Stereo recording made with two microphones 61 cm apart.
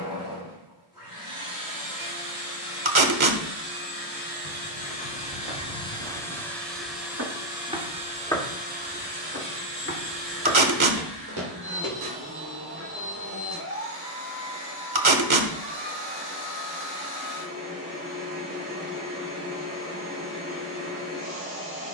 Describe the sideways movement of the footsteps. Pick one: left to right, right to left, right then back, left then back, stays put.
left then back.